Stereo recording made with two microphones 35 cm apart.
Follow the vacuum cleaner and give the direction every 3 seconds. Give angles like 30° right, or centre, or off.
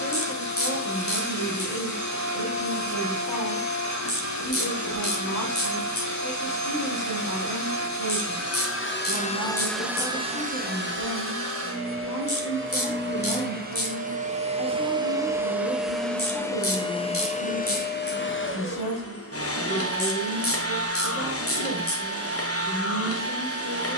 50° left, 50° left, 50° left, 20° right, 30° right, 10° left, 40° left, 40° left.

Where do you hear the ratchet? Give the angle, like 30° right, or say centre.
40° left.